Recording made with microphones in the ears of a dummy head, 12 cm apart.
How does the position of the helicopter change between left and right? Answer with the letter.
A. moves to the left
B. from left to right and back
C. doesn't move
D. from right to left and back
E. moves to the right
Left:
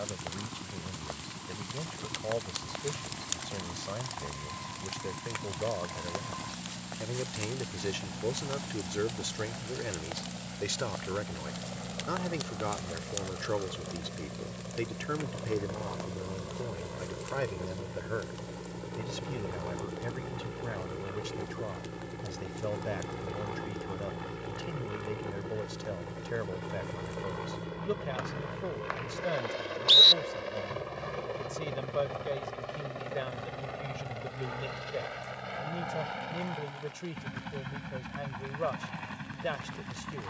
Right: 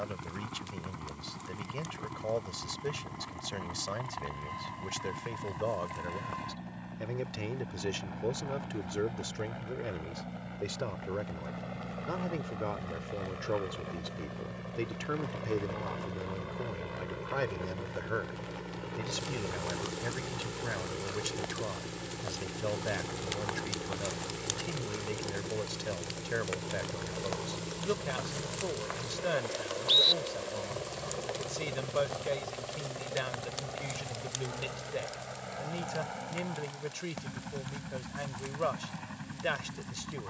A.